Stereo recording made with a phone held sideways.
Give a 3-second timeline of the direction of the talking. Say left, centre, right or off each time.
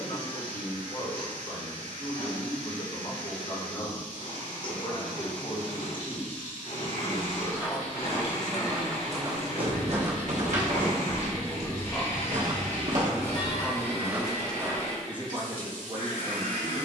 left, left, left, left, centre, right.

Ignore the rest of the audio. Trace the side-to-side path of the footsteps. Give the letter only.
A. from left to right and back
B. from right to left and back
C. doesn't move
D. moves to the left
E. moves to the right
A.